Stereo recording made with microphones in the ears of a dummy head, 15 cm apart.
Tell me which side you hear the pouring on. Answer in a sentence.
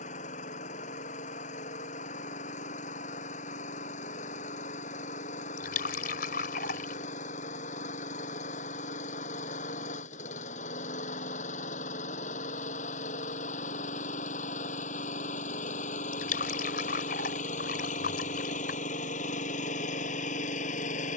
You can hear the pouring on the left.